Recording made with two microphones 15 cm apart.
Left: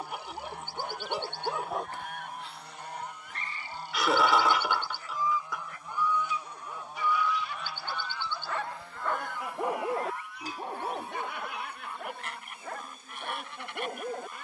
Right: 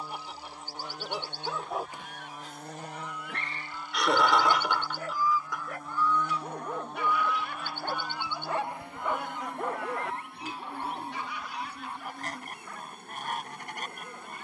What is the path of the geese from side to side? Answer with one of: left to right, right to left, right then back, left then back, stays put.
left to right.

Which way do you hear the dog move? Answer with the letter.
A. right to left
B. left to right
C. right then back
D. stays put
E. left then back
C.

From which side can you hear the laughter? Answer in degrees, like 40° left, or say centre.
centre.